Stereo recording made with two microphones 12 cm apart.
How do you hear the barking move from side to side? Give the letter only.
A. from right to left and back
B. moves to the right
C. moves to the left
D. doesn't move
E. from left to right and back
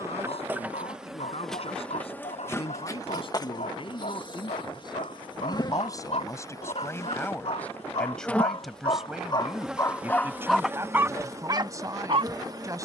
B.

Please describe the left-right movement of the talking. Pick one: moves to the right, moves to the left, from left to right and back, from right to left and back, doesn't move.
moves to the right.